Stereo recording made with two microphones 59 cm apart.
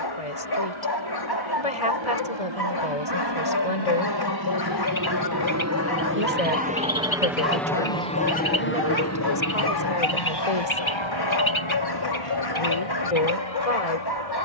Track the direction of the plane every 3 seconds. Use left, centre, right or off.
right, right, centre, left, left.